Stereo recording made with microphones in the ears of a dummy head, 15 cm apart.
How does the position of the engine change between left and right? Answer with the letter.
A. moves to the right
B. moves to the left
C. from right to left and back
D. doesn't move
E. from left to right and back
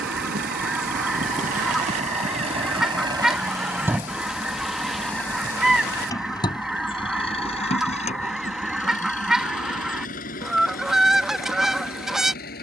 B.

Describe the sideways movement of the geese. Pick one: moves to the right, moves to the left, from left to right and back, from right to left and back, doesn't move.
doesn't move.